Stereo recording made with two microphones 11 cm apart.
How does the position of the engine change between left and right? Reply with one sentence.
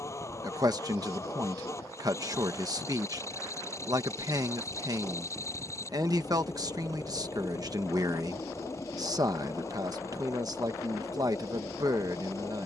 You can hear the engine stay in one place.